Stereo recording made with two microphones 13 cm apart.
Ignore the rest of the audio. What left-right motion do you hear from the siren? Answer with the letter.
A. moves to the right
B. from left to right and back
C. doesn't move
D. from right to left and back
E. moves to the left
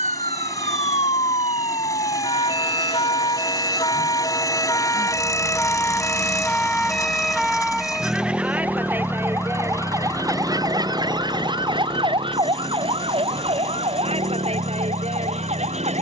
A.